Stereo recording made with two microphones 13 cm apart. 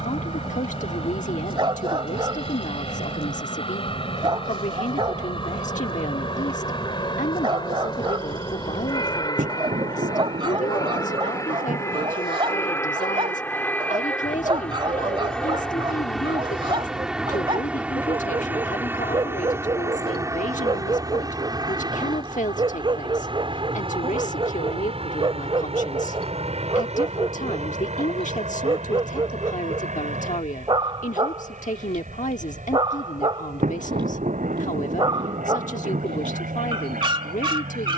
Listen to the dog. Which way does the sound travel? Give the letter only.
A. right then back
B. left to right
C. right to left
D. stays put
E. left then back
D.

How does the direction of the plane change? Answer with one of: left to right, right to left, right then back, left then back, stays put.
left to right.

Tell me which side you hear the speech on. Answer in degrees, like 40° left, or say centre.
70° left.